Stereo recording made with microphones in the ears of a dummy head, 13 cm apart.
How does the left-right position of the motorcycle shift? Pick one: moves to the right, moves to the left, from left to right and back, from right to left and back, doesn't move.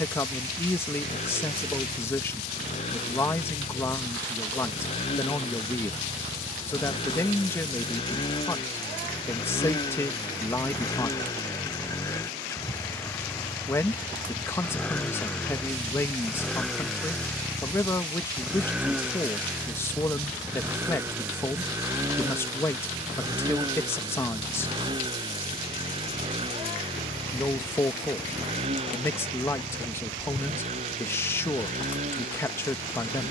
moves to the right.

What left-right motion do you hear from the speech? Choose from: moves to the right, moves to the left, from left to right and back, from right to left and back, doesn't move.
doesn't move.